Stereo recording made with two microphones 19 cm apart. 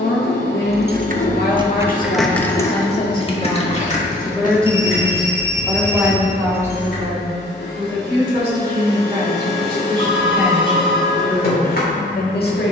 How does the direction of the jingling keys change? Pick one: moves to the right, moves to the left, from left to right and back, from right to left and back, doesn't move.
moves to the left.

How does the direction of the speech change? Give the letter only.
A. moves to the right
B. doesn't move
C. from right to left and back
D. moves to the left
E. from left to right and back
E.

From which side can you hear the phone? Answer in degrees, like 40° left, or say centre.
30° left.